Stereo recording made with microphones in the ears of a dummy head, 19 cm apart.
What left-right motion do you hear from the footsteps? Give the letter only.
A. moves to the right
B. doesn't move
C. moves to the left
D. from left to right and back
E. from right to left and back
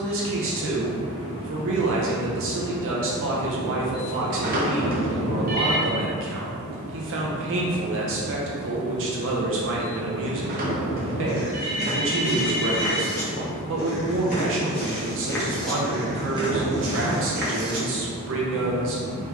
E.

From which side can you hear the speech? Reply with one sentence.
You can hear the speech on the right.